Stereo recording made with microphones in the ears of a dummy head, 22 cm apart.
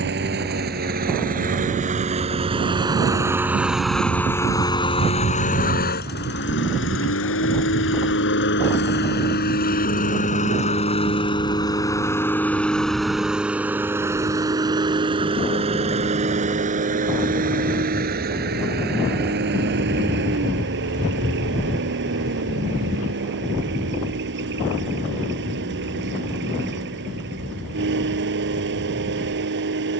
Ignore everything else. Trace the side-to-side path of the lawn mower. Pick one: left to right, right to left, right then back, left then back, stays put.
left then back.